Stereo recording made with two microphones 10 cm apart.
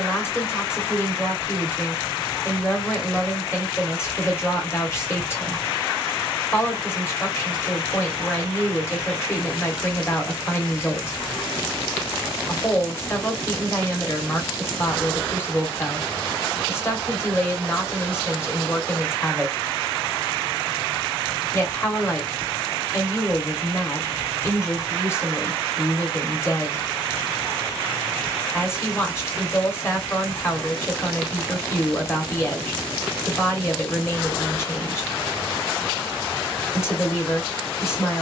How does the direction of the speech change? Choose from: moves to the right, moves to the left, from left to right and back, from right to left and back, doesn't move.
doesn't move.